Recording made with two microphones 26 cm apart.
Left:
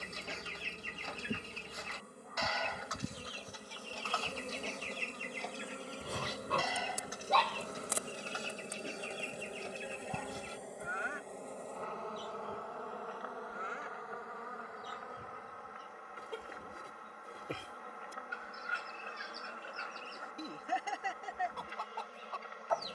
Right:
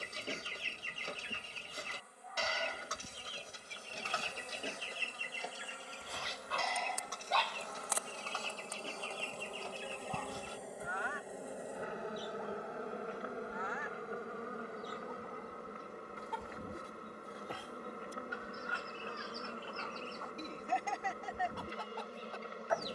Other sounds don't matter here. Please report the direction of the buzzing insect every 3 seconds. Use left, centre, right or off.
left, left, left, centre, right, right, right, right.